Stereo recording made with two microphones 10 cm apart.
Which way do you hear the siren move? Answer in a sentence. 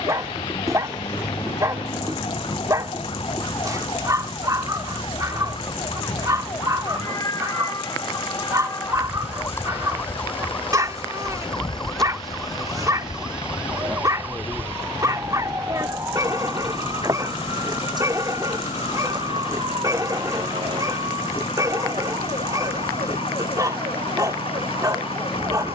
You can hear the siren go from the left side to the right.